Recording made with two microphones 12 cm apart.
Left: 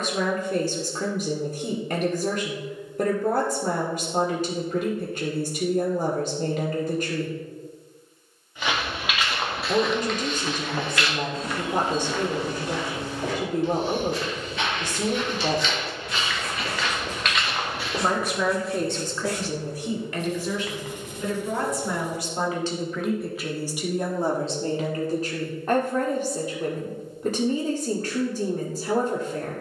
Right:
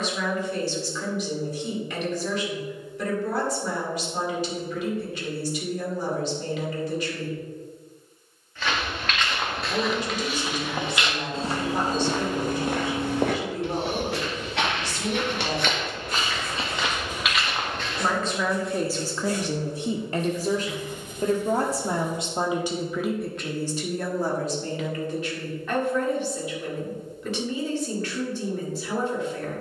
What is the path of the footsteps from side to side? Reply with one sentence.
In this clip you hear the footsteps go right and come back.